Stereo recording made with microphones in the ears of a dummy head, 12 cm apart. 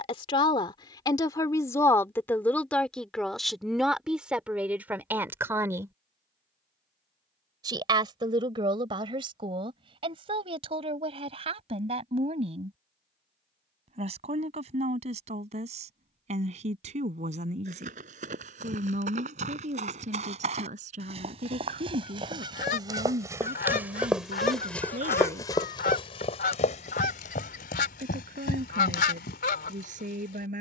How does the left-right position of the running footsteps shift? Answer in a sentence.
You can hear the running footsteps go from the right side to the left.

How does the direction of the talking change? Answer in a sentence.
You can hear the talking travel towards the right.